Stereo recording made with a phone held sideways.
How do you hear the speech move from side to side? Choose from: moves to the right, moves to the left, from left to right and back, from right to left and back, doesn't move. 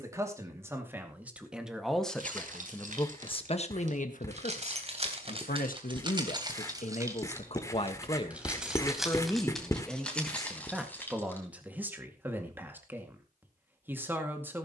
from right to left and back.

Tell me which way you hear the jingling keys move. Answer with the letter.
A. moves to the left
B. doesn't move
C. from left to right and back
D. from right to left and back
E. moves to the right
A.